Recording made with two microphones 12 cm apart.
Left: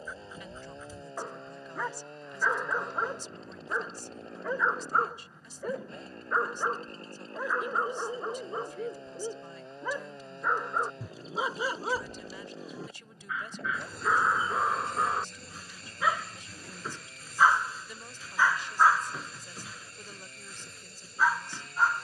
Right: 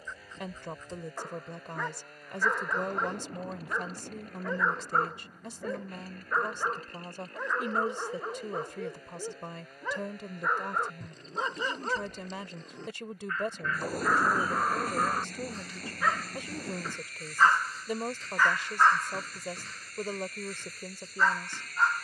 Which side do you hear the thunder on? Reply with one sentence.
You can hear the thunder on the right.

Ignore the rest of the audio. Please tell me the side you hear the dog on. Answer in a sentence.
In this clip you hear the dog in the centre.